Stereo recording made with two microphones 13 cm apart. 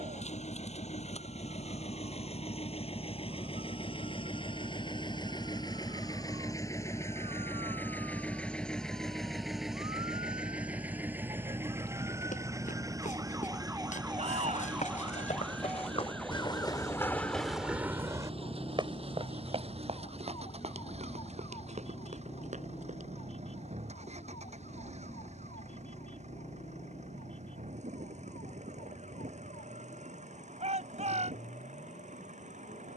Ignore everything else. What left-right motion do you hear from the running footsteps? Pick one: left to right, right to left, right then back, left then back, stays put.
left to right.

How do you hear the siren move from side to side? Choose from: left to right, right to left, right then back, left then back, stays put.
right to left.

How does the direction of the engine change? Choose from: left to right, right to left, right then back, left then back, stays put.
left to right.